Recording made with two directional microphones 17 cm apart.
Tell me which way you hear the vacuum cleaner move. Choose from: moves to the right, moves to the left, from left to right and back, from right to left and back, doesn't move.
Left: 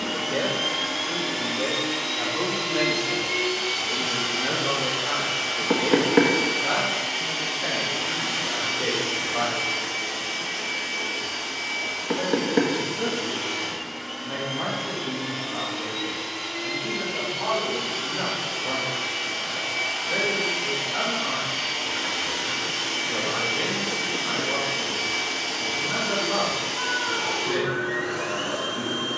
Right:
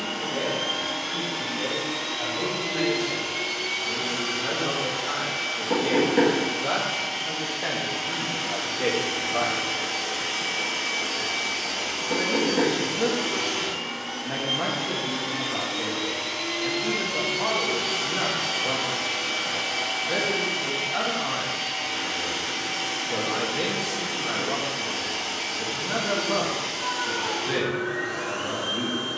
from left to right and back.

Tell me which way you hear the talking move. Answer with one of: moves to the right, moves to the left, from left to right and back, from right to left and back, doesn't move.
moves to the right.